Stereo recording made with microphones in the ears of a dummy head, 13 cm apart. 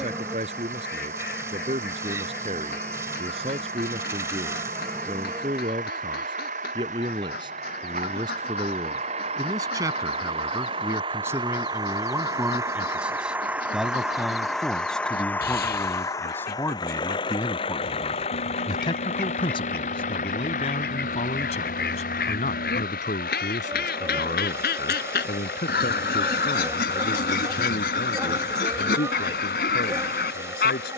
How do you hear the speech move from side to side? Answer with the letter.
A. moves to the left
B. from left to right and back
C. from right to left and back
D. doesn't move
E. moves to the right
A.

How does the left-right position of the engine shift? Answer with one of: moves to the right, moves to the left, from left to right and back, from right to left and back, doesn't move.
moves to the left.